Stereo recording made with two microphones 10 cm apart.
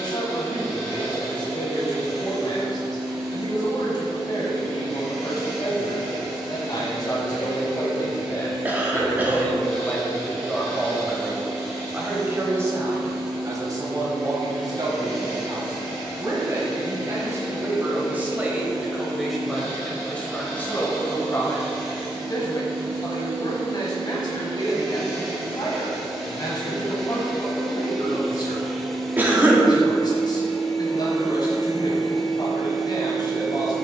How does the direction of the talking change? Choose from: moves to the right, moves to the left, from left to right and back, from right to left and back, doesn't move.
from left to right and back.